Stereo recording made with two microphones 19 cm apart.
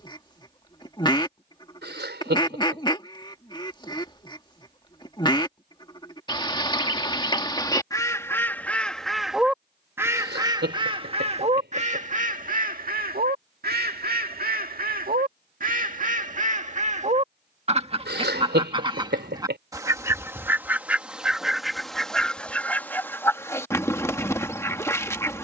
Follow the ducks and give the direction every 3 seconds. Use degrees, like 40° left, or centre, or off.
20° left, 20° left, 20° left, 20° right, 50° right, 40° right, 20° right, 10° left, 10° left.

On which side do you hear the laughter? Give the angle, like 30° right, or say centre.
70° right.